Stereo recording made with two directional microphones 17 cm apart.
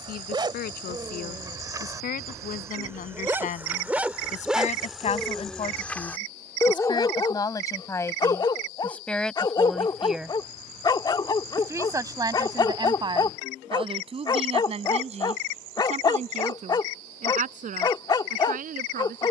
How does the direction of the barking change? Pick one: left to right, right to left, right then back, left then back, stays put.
right to left.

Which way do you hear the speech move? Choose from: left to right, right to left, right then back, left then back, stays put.
left to right.